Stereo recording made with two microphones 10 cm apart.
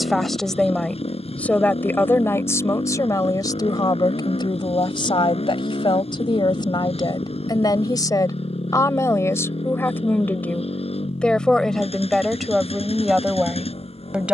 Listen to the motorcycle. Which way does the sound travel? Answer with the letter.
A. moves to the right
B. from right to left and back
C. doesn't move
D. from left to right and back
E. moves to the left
C.